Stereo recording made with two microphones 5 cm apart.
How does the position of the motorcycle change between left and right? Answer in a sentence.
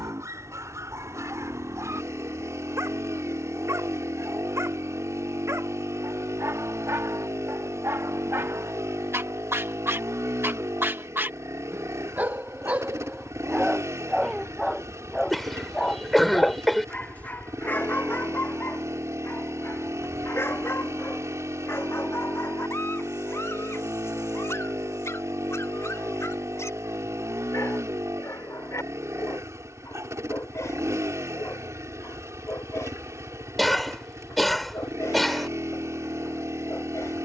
In this clip you hear the motorcycle stay in one place.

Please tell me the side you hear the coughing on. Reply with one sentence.
In this clip you hear the coughing in the centre.